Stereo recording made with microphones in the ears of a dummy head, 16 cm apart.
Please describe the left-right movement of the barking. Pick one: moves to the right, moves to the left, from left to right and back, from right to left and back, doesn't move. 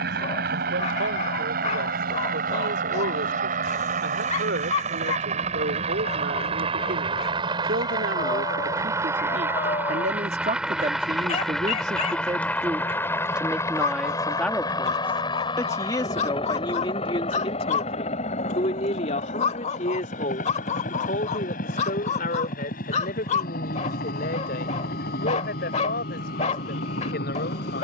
doesn't move.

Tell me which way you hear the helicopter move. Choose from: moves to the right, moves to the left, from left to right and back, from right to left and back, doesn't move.
moves to the left.